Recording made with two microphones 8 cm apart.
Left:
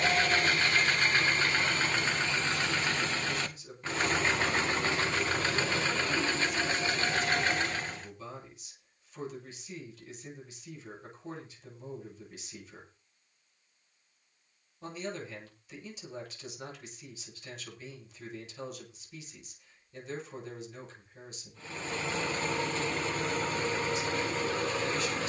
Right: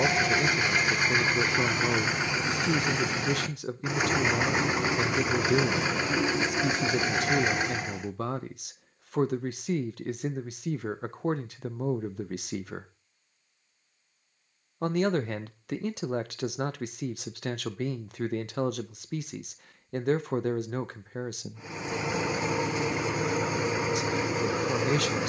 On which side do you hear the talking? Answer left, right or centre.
right.